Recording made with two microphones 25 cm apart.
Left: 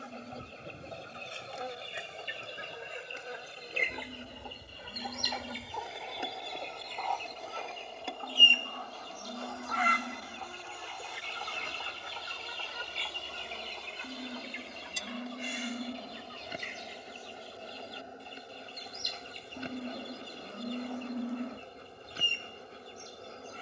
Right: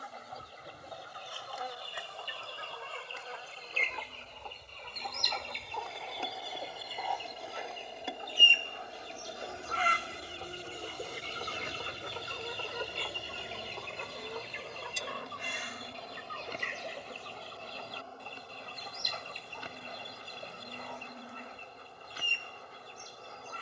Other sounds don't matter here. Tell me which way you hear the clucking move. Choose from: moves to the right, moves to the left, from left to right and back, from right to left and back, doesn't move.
moves to the right.